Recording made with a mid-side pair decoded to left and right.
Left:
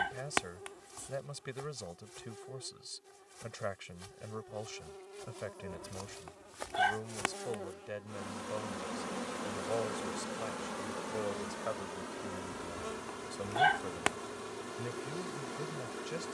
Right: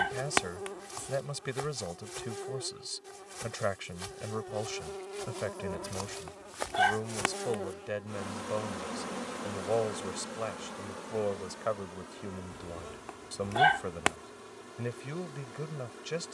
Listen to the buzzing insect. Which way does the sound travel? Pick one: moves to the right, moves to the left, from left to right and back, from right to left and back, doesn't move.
moves to the left.